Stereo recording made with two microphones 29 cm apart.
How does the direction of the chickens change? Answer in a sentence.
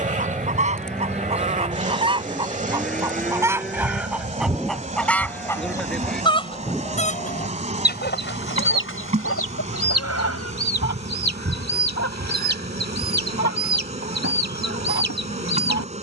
In this clip you hear the chickens move from right to left.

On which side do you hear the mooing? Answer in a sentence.
In this clip you hear the mooing in the centre.